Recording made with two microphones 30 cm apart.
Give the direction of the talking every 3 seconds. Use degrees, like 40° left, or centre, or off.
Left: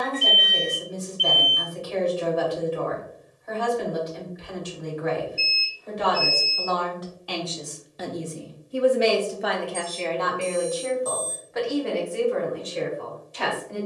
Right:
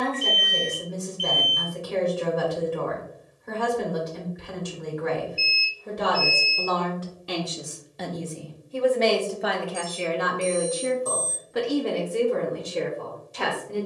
60° right, 60° right, 20° right, 20° right, 50° right.